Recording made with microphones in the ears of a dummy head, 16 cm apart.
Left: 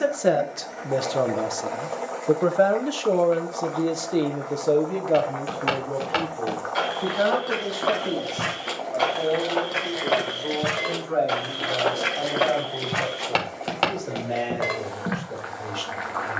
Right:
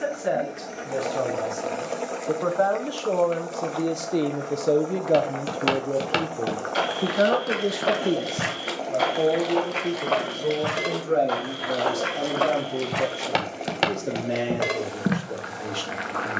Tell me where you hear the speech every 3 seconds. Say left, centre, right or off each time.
left, centre, right, right, right, right.